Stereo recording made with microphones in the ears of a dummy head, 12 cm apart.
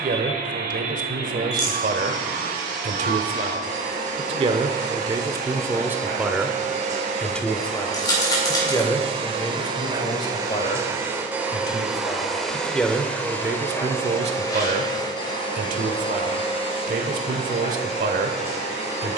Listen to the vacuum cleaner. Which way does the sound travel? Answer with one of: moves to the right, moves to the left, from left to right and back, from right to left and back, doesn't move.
moves to the left.